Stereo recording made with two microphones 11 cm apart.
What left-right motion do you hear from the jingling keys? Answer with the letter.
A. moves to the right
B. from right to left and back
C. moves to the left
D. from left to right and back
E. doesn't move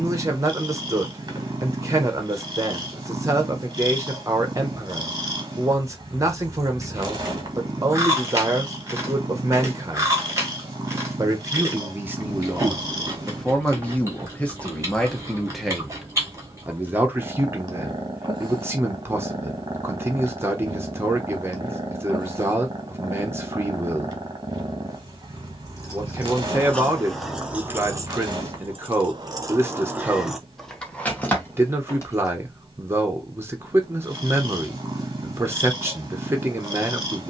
D.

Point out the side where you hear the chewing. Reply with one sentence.
You can hear the chewing on the right.